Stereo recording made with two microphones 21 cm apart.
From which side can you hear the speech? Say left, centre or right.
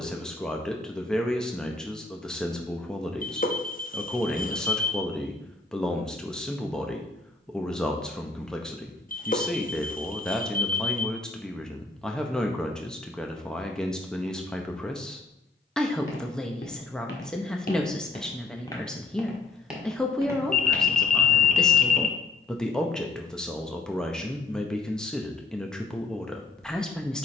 centre.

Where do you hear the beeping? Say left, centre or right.
left.